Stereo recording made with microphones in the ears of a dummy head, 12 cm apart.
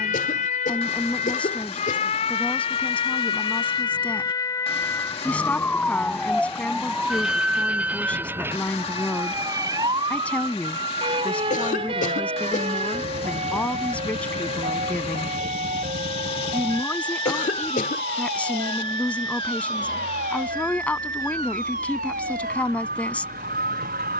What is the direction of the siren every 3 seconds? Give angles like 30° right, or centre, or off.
50° left, 20° left, 10° right, 30° right, 40° right, 50° right, 60° right, 60° right.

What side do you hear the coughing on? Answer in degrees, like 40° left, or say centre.
60° left.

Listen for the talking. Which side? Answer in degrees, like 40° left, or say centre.
10° left.